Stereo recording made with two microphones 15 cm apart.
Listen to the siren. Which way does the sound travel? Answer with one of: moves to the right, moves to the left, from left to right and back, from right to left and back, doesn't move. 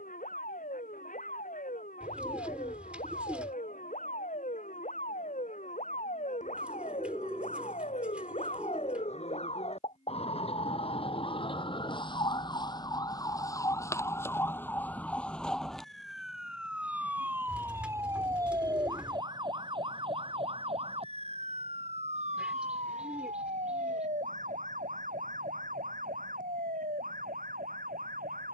moves to the right.